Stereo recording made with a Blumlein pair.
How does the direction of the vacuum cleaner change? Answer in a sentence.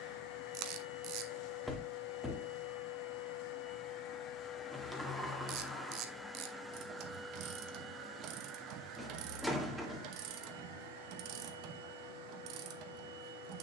In this clip you hear the vacuum cleaner go from the left side to the right.